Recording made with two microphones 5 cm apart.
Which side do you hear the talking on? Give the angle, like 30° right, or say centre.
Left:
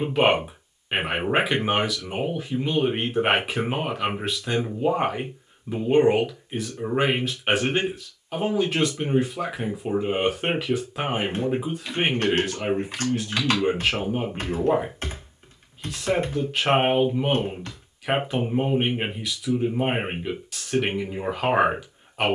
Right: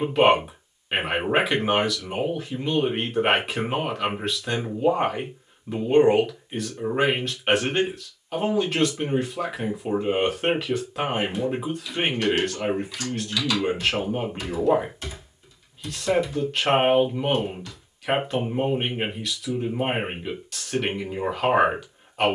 centre.